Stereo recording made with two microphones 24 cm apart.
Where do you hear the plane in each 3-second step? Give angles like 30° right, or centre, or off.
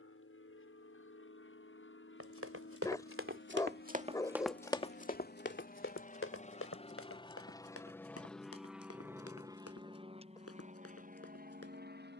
70° left, 50° left, 20° left, 30° right.